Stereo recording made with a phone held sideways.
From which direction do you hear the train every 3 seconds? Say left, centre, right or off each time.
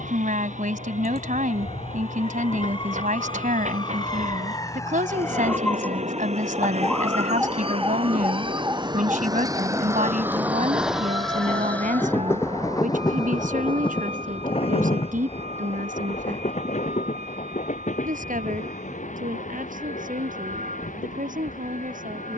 right, right, right, centre, left, left, left, left.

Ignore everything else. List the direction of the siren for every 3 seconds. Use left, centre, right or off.
left, left, centre, right, right, right, right, right.